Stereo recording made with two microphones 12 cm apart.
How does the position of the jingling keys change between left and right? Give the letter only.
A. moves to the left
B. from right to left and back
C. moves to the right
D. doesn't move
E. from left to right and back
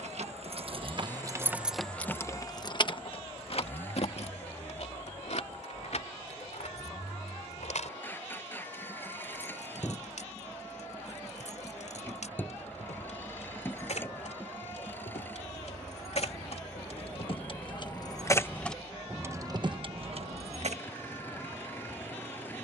B.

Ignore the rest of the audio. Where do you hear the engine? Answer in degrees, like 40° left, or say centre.
20° left.